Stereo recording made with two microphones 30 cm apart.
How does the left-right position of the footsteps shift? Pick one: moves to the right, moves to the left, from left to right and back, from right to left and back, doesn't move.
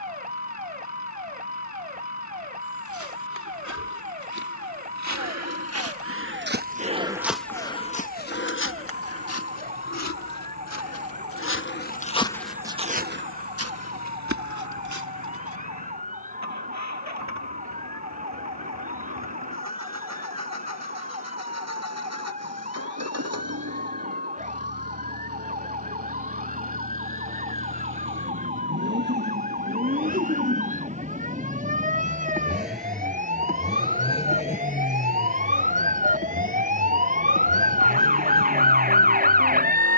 from right to left and back.